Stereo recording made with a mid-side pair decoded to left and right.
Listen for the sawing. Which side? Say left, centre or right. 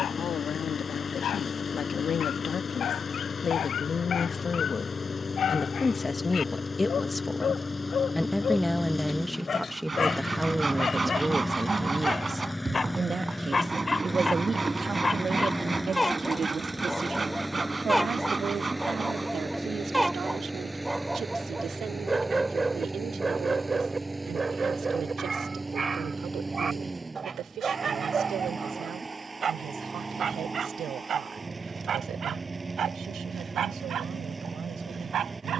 right.